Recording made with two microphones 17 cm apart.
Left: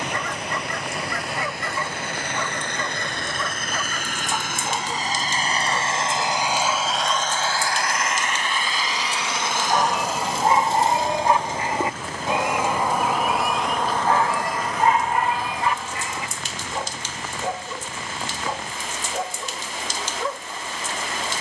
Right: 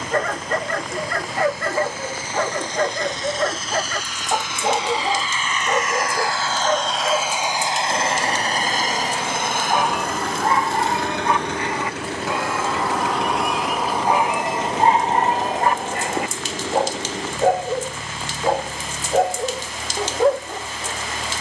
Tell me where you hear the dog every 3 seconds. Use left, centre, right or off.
right, right, right, centre, centre, right, right.